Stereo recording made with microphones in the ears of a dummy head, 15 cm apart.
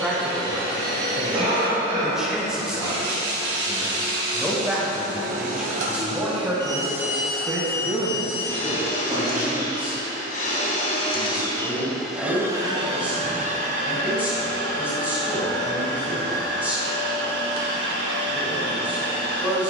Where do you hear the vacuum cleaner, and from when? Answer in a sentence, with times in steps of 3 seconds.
In this clip you hear the vacuum cleaner on the right from 0 s, in the centre from 6 s, on the left from 9 s and on the right from 12 s.